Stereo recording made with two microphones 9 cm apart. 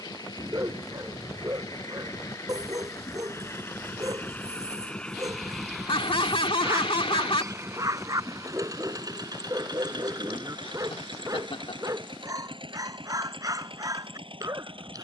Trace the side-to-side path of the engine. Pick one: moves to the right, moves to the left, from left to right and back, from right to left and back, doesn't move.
moves to the right.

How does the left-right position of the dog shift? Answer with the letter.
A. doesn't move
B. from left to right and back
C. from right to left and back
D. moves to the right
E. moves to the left
A.